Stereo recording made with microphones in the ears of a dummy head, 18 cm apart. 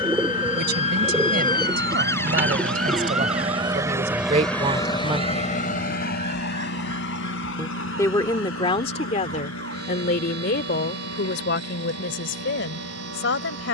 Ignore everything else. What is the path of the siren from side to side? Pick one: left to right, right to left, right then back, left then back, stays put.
left to right.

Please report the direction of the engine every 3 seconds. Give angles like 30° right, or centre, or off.
60° right, centre, 60° left, 80° left, 80° left.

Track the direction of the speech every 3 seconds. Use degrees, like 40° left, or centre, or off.
50° right, 30° right, 20° left, 50° left, 60° left.